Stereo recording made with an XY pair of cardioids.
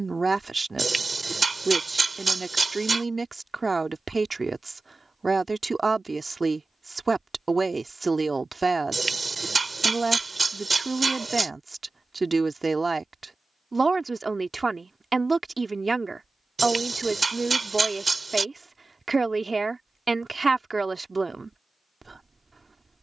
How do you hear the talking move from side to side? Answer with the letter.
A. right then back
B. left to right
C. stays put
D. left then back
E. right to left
C.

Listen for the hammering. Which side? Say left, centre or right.
right.